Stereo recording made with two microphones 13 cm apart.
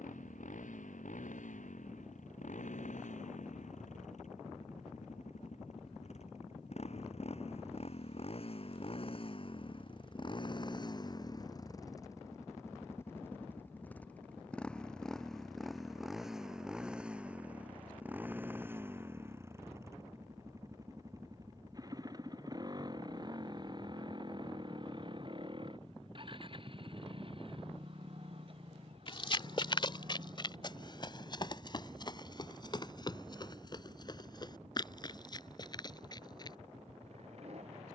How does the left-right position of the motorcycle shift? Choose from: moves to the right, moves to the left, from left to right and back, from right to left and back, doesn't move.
moves to the right.